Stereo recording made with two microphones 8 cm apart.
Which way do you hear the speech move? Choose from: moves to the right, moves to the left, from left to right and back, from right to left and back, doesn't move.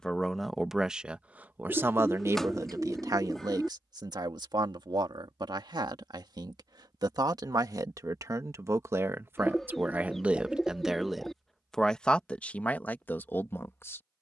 from left to right and back.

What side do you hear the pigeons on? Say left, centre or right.
centre.